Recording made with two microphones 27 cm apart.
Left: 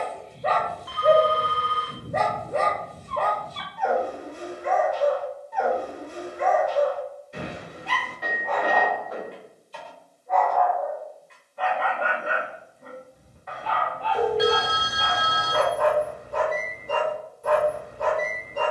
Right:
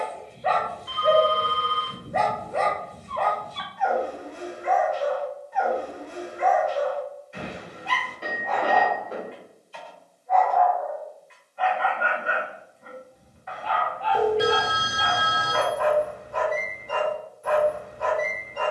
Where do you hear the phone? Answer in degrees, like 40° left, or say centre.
30° right.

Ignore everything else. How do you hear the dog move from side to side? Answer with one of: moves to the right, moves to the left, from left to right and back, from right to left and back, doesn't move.
doesn't move.